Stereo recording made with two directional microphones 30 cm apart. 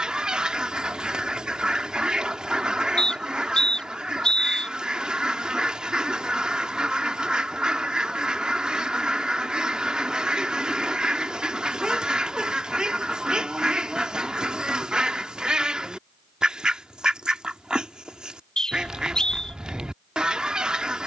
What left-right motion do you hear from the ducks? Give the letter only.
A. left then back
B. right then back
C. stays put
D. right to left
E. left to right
C.